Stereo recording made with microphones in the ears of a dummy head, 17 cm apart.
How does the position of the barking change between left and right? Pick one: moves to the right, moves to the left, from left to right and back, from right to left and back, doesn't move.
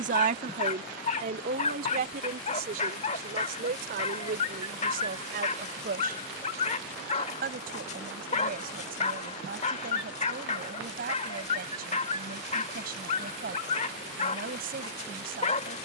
doesn't move.